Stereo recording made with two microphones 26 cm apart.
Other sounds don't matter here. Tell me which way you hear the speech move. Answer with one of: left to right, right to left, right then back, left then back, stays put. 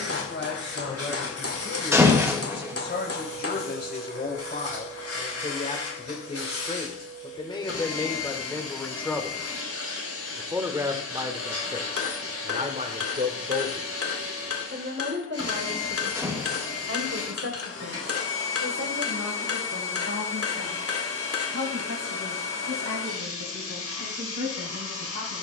left to right.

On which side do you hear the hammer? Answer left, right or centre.
left.